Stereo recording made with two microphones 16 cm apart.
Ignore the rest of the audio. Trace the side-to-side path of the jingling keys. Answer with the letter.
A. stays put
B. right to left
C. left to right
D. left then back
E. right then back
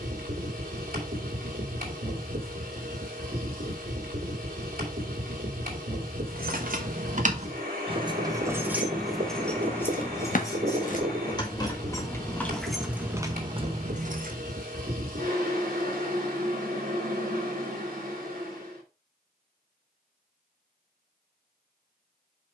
D.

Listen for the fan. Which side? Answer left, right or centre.
right.